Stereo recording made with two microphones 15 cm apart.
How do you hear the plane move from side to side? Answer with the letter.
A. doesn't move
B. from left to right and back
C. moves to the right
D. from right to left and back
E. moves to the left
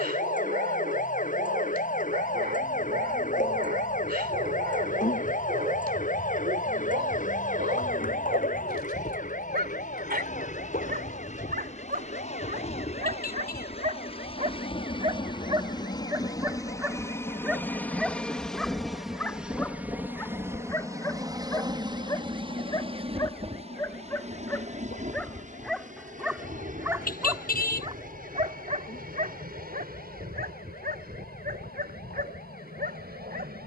C.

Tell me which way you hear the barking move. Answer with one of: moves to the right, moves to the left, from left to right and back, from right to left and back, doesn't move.
from right to left and back.